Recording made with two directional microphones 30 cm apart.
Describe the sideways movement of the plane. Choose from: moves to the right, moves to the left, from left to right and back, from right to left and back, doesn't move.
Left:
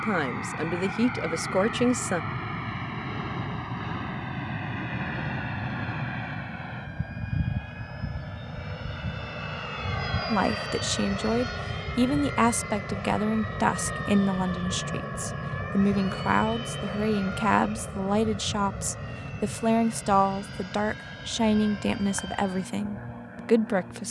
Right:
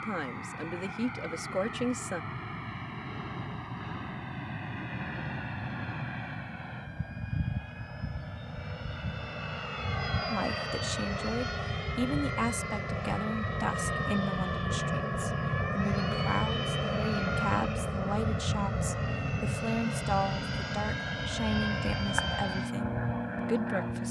moves to the right.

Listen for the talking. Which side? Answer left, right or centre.
left.